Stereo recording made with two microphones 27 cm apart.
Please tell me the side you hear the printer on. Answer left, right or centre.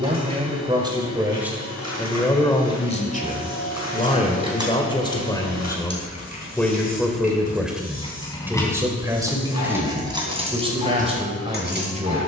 left.